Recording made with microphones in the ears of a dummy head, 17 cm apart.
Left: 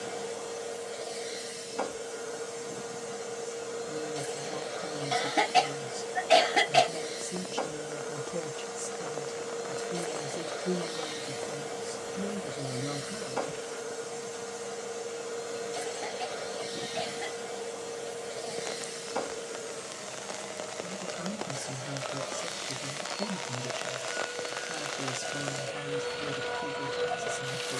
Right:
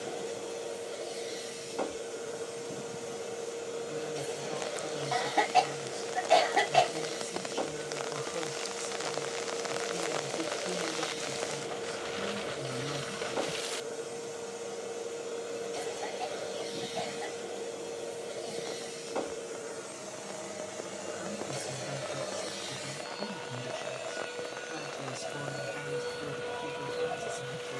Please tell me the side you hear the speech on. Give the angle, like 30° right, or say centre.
40° left.